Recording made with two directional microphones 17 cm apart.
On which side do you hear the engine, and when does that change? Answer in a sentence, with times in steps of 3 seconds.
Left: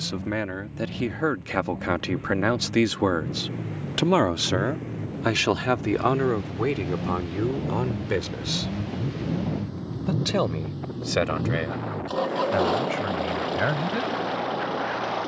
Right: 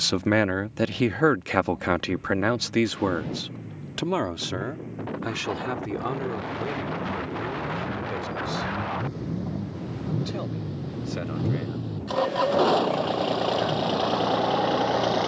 You can hear the engine on the left from 0 s, in the centre from 9 s and on the right from 12 s.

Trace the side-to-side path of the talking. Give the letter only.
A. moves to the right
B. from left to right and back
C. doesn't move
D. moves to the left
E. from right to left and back
D.